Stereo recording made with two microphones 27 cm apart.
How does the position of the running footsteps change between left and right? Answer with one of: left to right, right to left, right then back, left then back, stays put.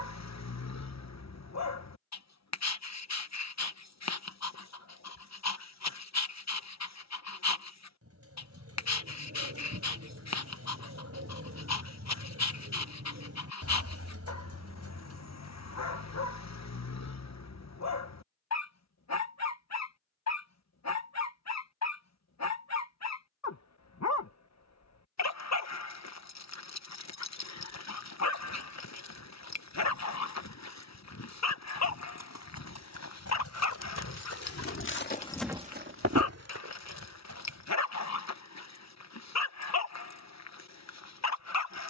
left to right.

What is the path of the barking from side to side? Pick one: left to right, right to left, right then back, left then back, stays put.
stays put.